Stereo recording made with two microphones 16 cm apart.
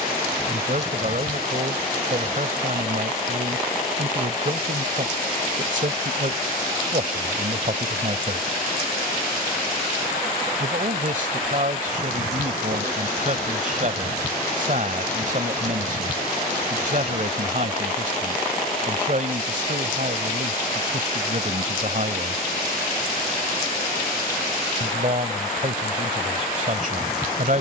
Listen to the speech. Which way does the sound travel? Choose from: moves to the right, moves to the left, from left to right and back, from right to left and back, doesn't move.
doesn't move.